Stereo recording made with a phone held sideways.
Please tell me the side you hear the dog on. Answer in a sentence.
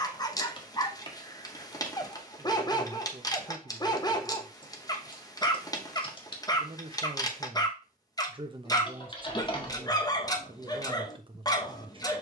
You can hear the dog on the left.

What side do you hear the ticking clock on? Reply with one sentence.
You can hear the ticking clock on the left.